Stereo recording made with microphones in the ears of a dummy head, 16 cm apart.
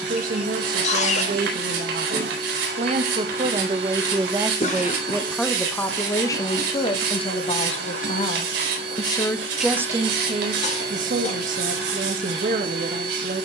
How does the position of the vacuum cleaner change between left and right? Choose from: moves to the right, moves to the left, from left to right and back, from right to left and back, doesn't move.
doesn't move.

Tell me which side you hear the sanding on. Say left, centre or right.
right.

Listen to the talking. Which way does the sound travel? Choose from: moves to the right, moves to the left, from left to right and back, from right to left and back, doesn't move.
from right to left and back.